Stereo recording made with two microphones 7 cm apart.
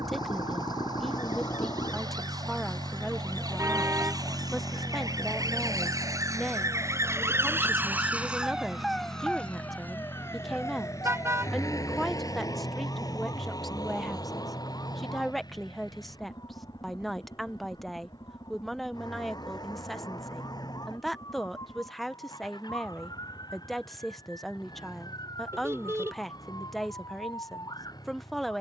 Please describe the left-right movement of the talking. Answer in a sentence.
You can hear the talking stay put.